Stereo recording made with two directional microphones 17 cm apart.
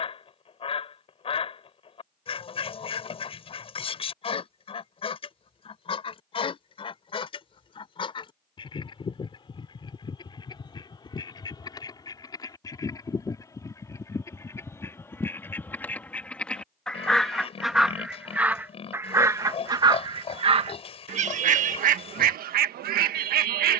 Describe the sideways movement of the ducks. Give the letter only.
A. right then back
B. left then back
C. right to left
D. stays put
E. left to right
E.